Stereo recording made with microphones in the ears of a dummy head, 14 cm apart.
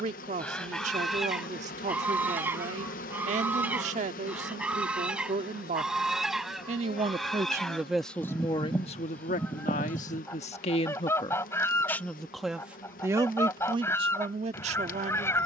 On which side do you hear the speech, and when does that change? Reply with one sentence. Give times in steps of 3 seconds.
You can hear the speech on the right from 0 s, in the centre from 6 s, on the left from 9 s and on the right from 12 s.